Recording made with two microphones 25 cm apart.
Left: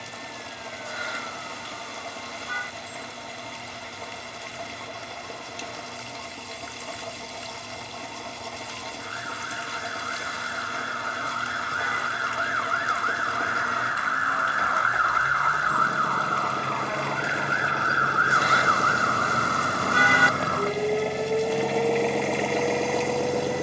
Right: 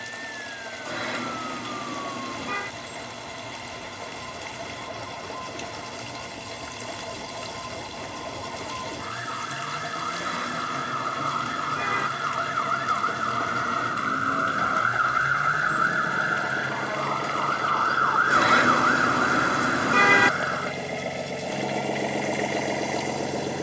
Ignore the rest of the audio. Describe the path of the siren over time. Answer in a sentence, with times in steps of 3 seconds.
You can hear the siren on the right from 0 s, in the centre from 15 s and on the left from 18 s.